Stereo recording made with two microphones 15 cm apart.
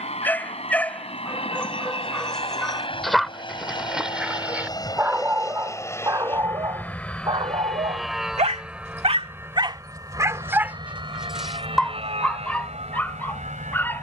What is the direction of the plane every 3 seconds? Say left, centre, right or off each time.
left, left, centre, right, right.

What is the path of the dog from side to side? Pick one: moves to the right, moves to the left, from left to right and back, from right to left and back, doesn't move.
from left to right and back.